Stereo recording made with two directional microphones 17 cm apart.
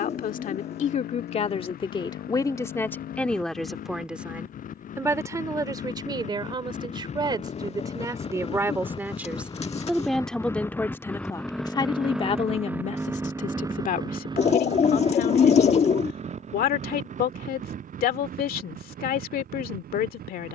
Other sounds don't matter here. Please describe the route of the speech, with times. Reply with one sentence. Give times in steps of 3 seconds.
In this clip you hear the speech on the left from 0 s, in the centre from 3 s, on the right from 6 s, in the centre from 9 s and on the left from 12 s.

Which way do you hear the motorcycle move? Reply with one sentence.
You can hear the motorcycle go from the left side to the right.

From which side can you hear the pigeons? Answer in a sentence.
In this clip you hear the pigeons on the left.